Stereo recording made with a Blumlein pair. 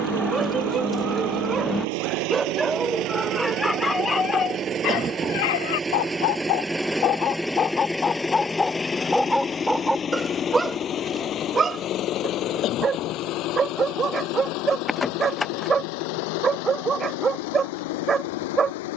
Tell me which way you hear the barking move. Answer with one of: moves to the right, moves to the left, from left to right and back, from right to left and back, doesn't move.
from right to left and back.